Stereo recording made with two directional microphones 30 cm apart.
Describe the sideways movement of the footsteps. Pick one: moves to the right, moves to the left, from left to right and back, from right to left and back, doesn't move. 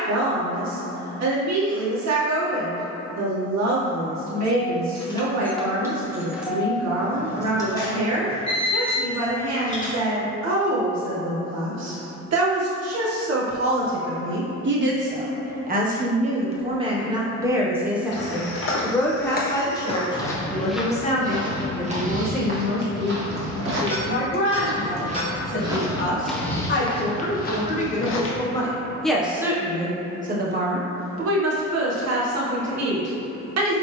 from left to right and back.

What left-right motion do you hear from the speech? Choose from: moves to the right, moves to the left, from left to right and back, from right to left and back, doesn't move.
from right to left and back.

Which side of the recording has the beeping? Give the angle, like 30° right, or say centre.
20° left.